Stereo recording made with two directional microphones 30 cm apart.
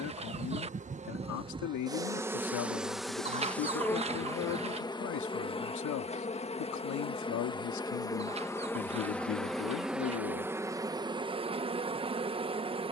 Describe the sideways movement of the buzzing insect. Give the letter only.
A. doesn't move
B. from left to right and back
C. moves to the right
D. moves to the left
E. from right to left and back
E.